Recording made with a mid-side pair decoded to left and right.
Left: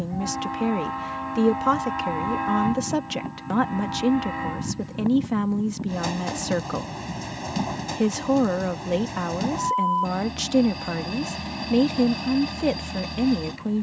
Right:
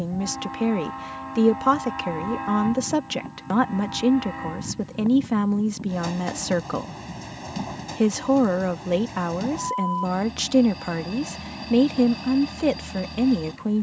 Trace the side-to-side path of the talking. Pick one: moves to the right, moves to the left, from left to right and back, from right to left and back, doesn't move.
doesn't move.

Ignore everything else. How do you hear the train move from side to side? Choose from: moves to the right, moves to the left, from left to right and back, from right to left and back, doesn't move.
doesn't move.